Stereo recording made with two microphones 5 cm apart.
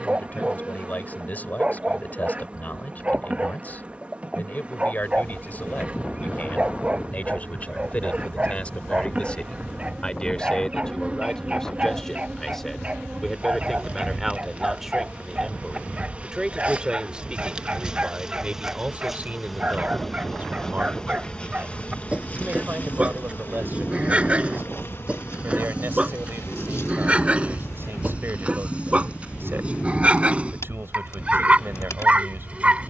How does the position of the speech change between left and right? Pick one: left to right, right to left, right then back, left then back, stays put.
left to right.